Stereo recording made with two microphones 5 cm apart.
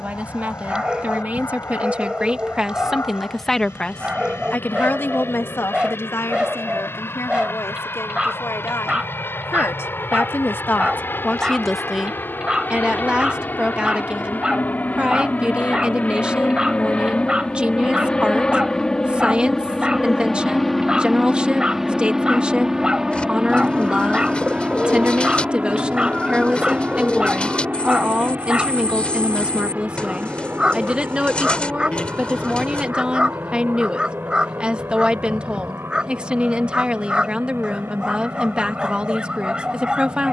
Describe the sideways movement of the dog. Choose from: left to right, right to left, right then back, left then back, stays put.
stays put.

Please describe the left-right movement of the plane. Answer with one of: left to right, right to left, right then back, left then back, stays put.
left to right.